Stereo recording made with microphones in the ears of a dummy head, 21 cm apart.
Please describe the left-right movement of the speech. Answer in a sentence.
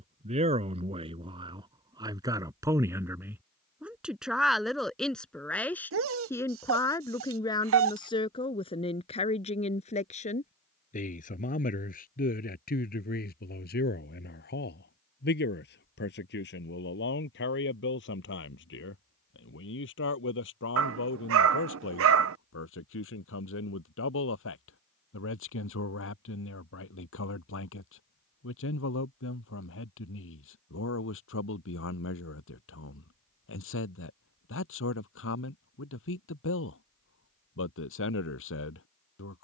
You can hear the speech move to the left.